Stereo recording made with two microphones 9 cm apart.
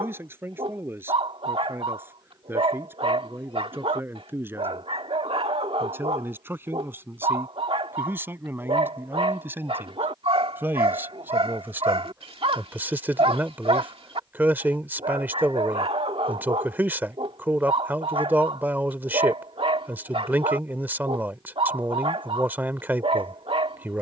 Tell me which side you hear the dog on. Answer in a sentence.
In this clip you hear the dog on the right.